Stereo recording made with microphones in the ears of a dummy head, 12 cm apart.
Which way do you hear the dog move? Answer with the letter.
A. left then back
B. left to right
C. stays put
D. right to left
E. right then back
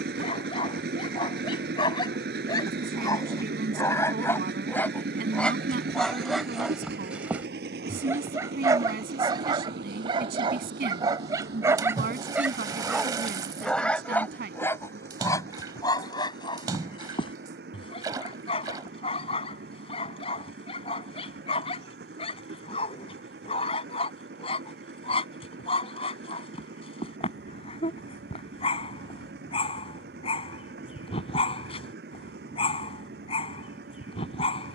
E.